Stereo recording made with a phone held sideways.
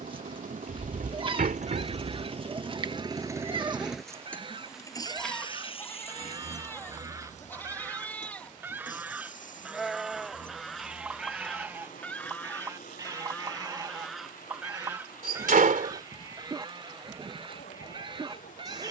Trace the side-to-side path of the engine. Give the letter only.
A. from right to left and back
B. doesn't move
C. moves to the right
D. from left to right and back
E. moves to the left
E.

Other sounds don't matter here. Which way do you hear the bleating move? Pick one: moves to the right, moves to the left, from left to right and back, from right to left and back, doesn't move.
from right to left and back.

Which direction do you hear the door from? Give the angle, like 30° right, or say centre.
80° right.